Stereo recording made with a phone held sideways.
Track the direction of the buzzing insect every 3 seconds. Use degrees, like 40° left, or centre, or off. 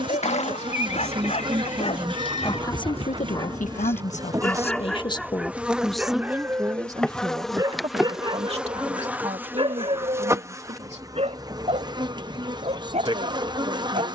40° right, 20° right, centre, 20° right, 30° right.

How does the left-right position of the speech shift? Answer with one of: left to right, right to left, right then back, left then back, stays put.
left then back.